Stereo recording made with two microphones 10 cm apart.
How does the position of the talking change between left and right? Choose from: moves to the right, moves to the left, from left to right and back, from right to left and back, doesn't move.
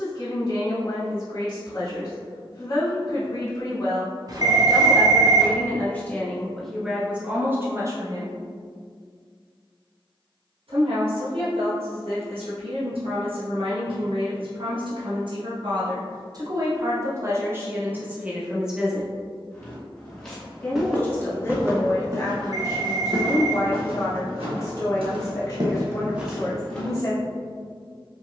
from left to right and back.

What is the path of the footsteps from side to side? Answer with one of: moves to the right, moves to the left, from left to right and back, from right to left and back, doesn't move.
from left to right and back.